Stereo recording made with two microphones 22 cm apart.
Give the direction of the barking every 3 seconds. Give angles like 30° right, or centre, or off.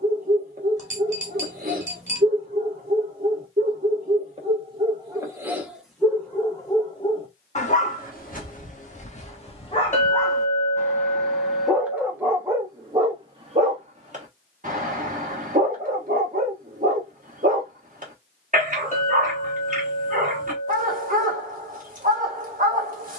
40° right, 30° right, 30° left, 10° left, 20° right, 40° right, 40° right, 40° right.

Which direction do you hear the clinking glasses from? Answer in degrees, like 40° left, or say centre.
30° left.